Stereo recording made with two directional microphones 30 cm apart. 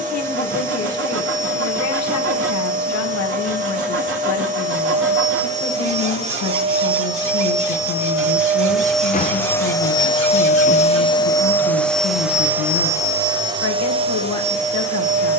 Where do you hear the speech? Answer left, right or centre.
left.